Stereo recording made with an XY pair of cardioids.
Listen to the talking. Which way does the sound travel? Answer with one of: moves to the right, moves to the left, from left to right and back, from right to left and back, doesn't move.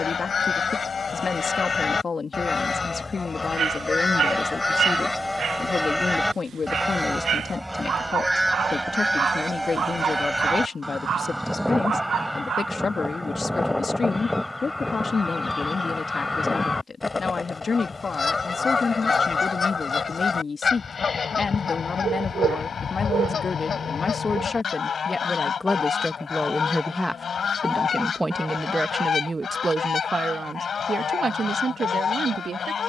moves to the right.